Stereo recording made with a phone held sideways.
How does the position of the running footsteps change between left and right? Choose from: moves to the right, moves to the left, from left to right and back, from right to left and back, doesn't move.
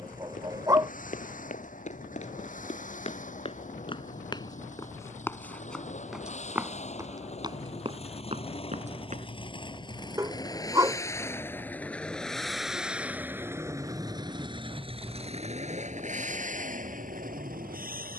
moves to the right.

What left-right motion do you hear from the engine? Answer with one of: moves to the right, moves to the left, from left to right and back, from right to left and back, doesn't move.
moves to the right.